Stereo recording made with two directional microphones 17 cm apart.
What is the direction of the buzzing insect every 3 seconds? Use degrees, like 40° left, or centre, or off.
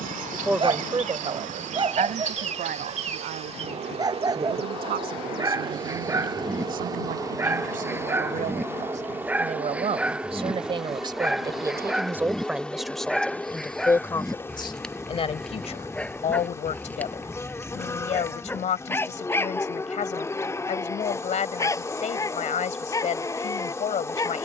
50° right, 30° right, 20° right, 10° right, 10° left, 20° left, 20° left, 20° left.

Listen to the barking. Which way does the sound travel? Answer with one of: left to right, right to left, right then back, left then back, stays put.
right to left.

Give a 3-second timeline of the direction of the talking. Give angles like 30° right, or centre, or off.
40° right, 60° right, 50° right, 30° right, 10° left, 40° left, 40° left, 40° left.